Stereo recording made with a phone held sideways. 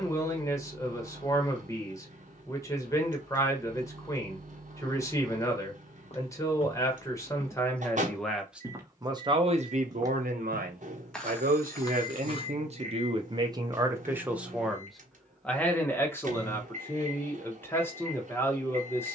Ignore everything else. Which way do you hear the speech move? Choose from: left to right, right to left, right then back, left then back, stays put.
right then back.